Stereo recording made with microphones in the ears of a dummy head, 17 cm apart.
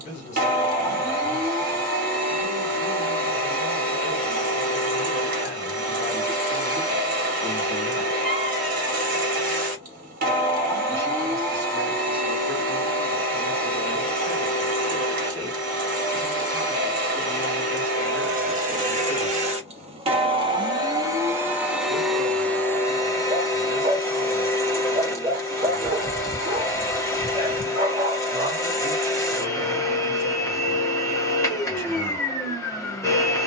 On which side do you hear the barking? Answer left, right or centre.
right.